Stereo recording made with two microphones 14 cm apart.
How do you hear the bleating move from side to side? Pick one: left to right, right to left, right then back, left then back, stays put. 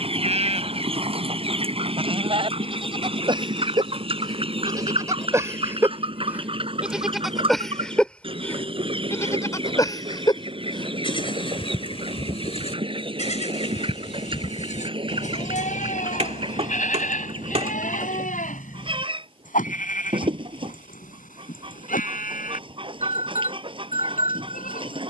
right to left.